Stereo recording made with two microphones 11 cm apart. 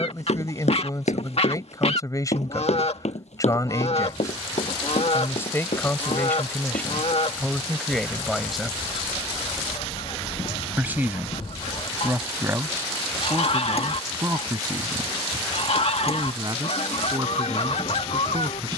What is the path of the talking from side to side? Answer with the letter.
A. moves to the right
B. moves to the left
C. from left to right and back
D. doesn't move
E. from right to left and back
A.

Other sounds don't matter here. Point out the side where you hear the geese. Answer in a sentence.
You can hear the geese on the left.